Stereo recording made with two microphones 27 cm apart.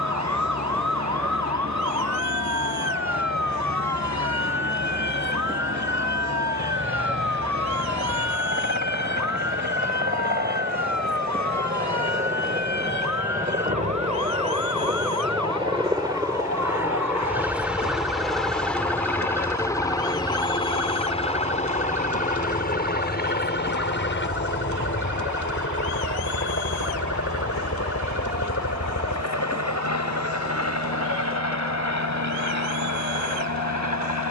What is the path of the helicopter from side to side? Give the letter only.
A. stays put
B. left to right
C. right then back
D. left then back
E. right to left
E.